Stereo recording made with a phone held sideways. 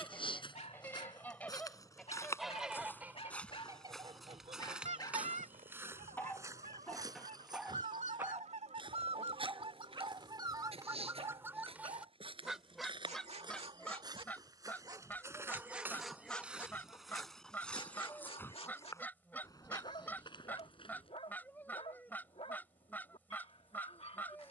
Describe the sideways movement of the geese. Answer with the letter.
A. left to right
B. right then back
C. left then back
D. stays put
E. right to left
B.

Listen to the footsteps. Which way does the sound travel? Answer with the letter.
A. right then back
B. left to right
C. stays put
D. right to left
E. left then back
A.